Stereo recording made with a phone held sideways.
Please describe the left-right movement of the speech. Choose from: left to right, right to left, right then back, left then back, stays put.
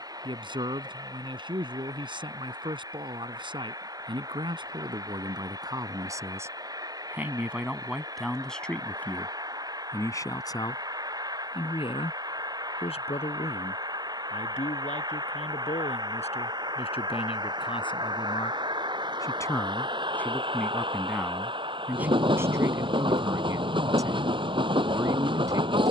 left then back.